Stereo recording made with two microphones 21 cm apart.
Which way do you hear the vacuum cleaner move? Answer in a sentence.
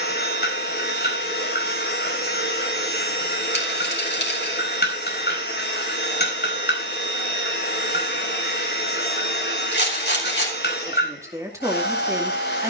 In this clip you hear the vacuum cleaner stay in one place.